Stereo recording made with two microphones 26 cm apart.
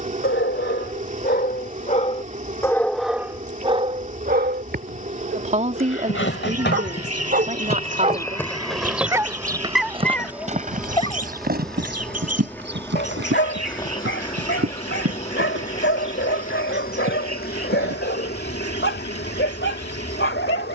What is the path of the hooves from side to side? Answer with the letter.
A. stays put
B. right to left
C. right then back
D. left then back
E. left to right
E.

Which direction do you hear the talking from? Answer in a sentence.
In this clip you hear the talking on the right.